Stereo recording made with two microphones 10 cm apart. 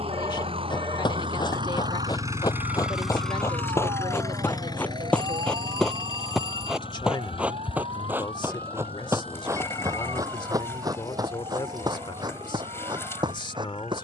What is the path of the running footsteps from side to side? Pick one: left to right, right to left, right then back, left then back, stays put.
left to right.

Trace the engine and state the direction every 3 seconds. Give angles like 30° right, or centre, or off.
50° right, 30° left, 60° left, 70° left, 70° left.